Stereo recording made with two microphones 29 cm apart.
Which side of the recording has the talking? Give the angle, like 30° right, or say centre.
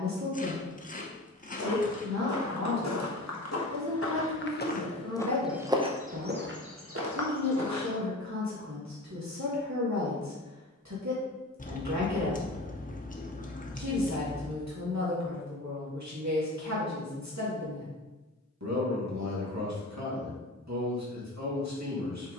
70° right.